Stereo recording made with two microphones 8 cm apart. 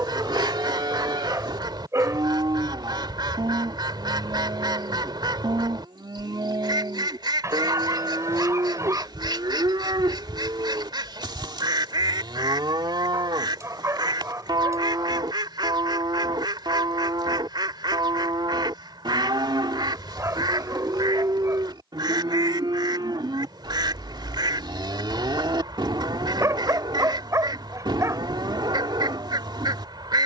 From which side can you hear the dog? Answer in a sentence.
You can hear the dog on the right.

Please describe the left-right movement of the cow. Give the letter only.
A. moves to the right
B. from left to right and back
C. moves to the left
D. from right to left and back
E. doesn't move
E.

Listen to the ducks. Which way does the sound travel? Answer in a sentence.
You can hear the ducks stay put.